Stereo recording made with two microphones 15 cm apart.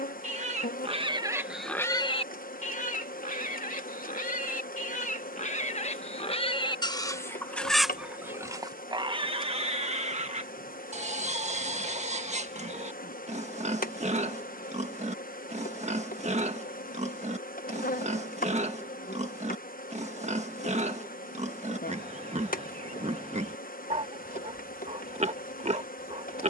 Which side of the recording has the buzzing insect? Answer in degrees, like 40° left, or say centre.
80° left.